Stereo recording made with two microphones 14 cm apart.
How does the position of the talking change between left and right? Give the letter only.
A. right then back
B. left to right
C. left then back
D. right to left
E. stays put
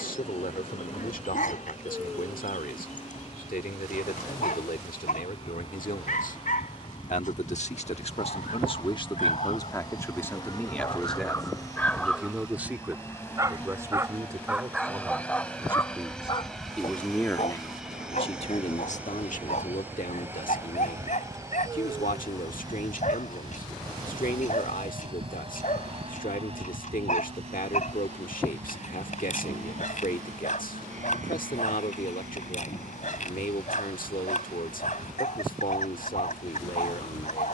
A.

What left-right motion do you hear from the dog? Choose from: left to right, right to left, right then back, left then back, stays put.
right then back.